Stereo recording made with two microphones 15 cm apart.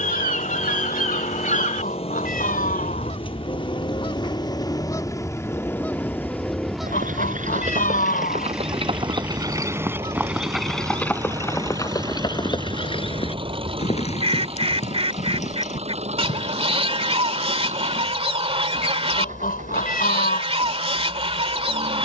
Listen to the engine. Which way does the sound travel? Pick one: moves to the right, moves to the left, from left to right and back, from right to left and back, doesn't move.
moves to the right.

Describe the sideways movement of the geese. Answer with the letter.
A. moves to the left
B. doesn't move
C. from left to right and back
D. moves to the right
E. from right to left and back
D.